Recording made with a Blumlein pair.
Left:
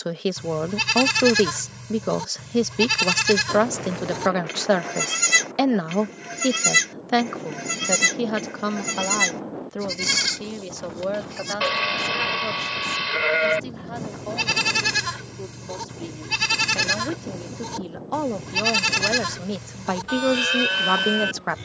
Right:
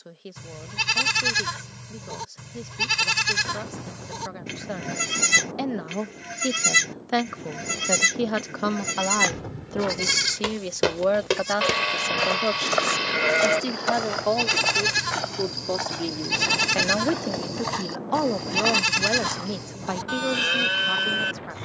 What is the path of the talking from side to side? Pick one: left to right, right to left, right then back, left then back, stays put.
right then back.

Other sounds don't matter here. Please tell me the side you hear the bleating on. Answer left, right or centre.
centre.